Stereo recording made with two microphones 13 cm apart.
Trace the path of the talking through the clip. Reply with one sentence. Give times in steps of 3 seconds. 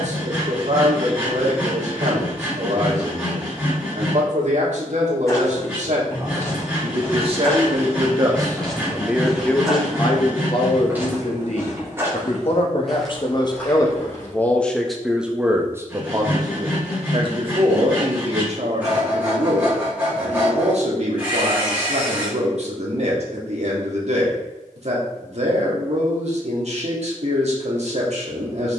You can hear the talking on the right from 0 s, on the left from 9 s and on the right from 15 s.